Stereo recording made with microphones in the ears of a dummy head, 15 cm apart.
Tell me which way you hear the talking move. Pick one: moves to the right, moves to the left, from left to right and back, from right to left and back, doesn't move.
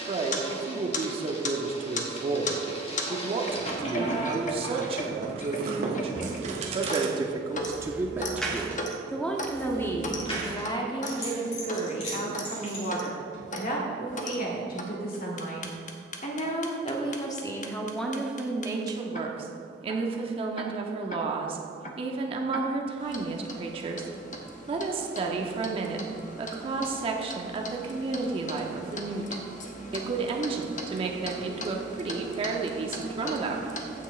from right to left and back.